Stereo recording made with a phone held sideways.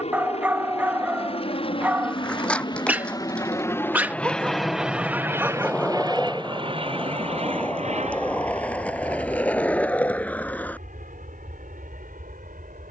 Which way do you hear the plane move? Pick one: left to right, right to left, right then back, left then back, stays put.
left to right.